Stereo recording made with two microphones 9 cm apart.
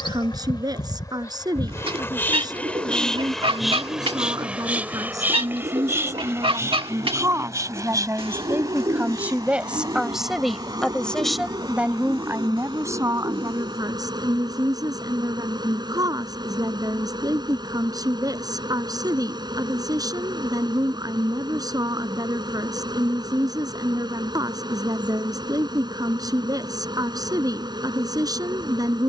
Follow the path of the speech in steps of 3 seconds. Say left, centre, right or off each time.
right, right, right, centre, right, right, right, right, right, right.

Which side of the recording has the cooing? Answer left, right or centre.
right.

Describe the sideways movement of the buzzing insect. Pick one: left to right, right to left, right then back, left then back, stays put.
left to right.